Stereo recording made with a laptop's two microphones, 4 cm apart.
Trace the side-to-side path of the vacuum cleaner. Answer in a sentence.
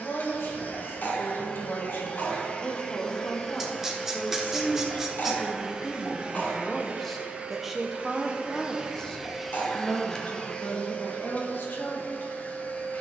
In this clip you hear the vacuum cleaner go right and come back.